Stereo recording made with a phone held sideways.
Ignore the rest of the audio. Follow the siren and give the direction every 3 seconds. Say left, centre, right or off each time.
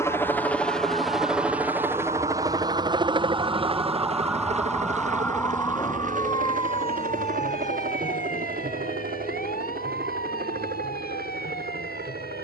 right, centre, left, left.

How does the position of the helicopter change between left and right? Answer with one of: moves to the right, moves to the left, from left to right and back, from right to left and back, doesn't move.
moves to the right.